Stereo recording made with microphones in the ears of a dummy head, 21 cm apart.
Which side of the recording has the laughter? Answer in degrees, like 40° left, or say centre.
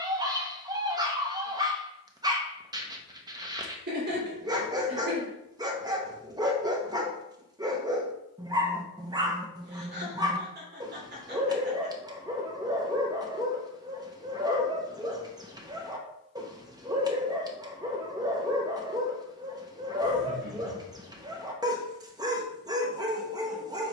50° right.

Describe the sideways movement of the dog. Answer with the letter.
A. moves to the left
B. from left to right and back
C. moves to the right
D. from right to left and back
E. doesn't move
E.